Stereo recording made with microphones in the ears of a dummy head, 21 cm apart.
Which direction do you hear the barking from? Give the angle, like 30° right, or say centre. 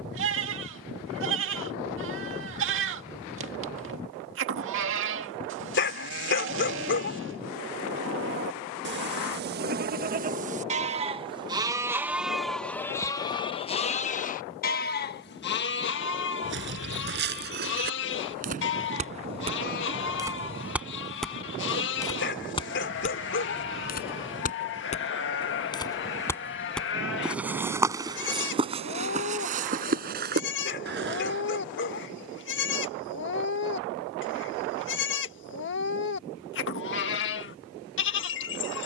50° left.